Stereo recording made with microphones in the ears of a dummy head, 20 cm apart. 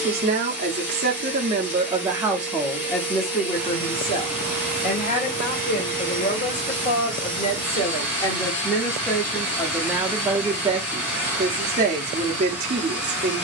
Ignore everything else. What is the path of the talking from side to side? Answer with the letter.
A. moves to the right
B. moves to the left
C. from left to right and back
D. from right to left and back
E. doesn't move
D.